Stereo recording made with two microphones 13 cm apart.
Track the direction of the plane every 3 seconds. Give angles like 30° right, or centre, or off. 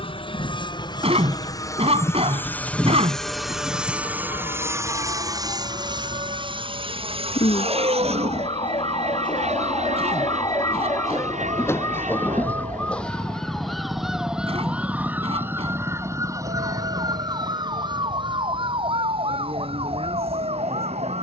30° left, 20° right, 50° right, 60° right, 70° right, 70° right, 70° right.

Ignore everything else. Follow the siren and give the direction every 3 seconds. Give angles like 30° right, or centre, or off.
60° left, 60° left, 50° left, 30° left, centre, 30° right, 50° right.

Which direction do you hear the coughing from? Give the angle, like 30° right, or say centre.
50° right.